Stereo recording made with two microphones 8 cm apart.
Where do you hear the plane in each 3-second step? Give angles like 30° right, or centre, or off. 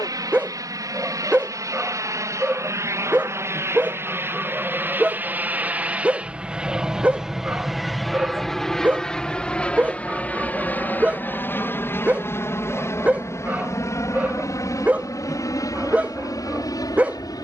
50° right, 30° right, centre, 20° left, 40° left, 50° left.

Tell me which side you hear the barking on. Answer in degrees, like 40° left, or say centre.
20° right.